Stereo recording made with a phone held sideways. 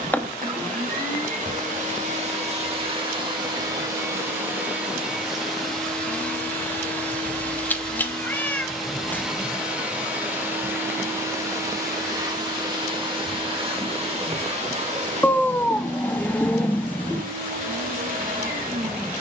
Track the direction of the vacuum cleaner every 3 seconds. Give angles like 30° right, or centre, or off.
50° right, 10° right, 10° left, 10° right, 30° right, 50° right, 60° right.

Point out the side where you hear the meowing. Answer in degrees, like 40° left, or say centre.
10° left.